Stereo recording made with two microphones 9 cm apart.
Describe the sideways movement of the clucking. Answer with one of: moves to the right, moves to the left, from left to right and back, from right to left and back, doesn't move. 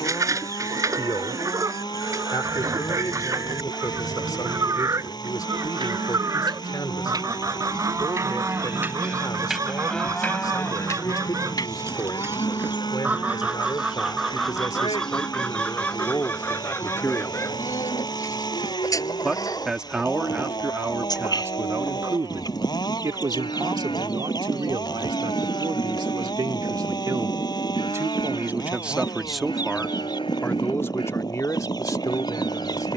moves to the left.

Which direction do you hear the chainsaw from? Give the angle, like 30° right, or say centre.
50° left.